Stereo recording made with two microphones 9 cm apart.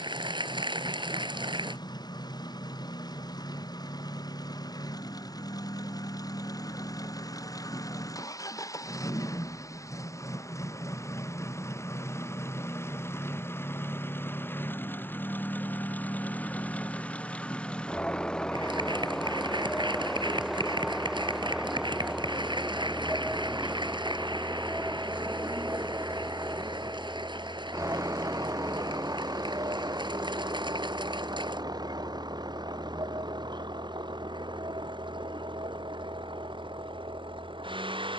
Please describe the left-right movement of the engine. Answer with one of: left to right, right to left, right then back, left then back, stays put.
left to right.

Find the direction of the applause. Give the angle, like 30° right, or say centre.
60° right.